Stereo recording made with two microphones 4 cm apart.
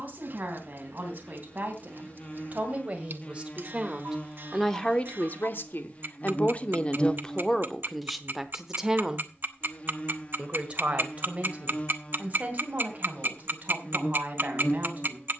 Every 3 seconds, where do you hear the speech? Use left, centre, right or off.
right, centre, centre, right, right.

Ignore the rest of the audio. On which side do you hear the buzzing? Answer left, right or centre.
left.